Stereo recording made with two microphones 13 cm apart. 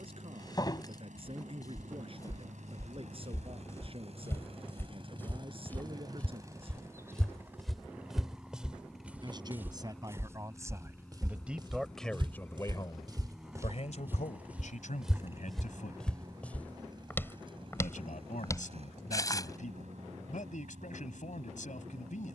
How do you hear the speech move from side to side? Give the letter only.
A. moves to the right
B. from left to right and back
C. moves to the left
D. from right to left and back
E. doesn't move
C.